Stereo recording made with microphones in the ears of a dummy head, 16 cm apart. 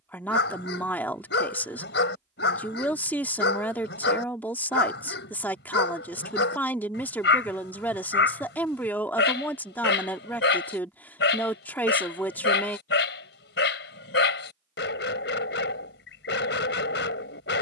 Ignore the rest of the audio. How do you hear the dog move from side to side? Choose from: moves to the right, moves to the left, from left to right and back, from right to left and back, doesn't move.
doesn't move.